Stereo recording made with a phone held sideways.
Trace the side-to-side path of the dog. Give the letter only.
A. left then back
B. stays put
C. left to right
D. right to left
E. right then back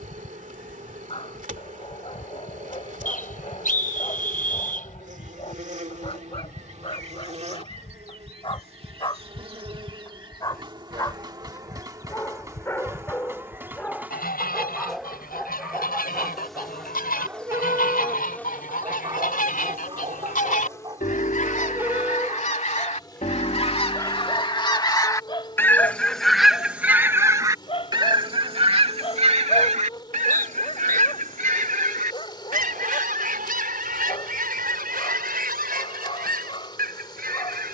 E.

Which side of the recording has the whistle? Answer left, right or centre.
left.